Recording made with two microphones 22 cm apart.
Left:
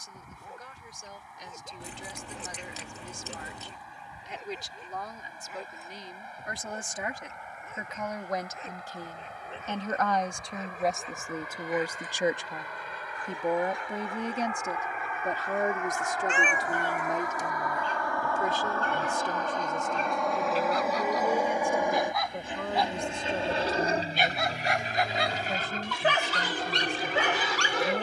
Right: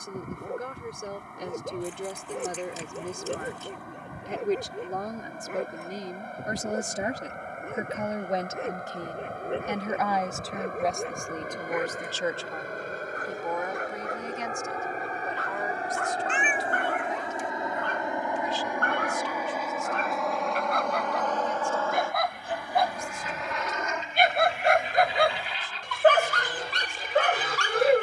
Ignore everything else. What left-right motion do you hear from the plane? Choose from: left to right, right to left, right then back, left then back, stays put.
right to left.